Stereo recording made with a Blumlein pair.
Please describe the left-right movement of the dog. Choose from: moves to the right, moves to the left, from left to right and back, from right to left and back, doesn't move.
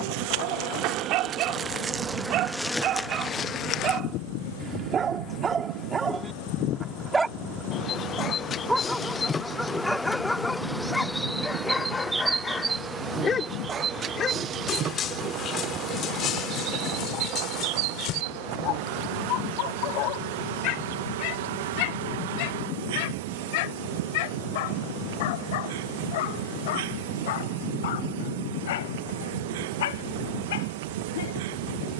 moves to the left.